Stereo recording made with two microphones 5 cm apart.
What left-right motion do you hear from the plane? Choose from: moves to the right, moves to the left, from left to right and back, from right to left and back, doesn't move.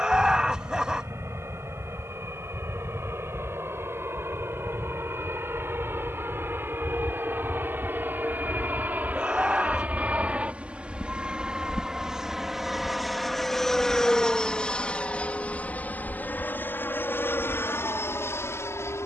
moves to the left.